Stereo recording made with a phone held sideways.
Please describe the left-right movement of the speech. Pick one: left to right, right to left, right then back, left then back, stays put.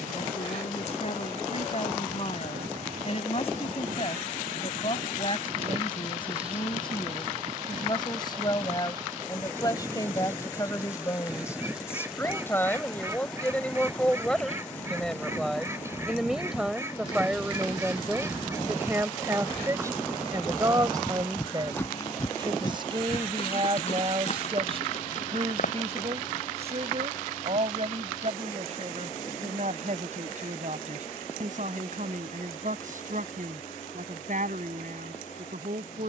left to right.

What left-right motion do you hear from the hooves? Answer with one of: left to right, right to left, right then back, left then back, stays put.
right to left.